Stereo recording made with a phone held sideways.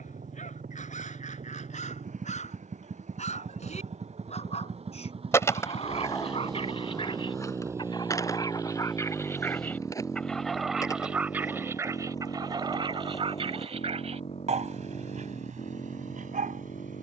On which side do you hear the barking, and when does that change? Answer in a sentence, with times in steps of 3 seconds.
In this clip you hear the barking on the left from 0 s, in the centre from 9 s and on the right from 12 s.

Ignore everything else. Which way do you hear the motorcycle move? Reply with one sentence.
You can hear the motorcycle move from right to left.